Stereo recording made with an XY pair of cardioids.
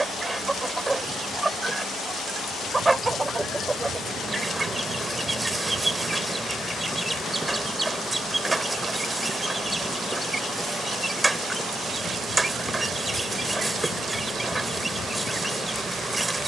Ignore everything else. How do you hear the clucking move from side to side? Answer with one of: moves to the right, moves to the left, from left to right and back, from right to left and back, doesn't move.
doesn't move.